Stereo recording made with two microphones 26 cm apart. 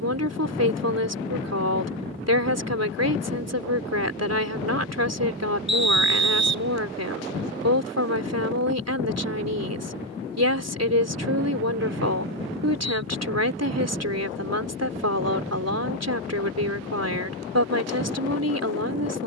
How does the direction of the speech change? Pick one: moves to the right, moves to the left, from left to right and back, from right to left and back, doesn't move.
doesn't move.